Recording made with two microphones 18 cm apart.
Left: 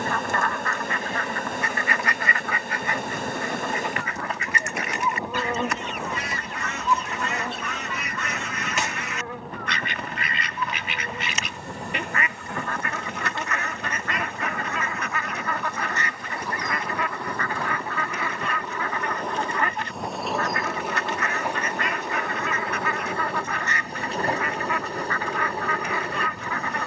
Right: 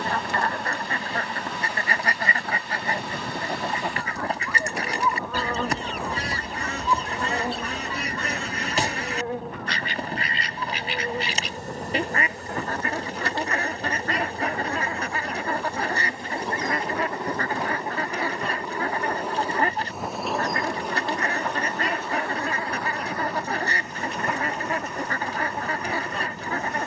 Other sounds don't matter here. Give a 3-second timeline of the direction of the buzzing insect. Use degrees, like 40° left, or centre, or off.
50° left, 30° left, 20° right, 40° right, 40° right, 30° right, 10° right, 20° left, 30° left.